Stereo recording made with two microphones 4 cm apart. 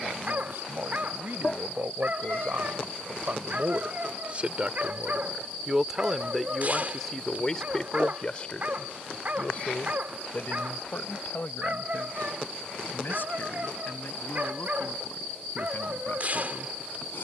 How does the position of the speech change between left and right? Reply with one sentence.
You can hear the speech move from right to left.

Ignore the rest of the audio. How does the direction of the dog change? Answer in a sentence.
You can hear the dog stay in one place.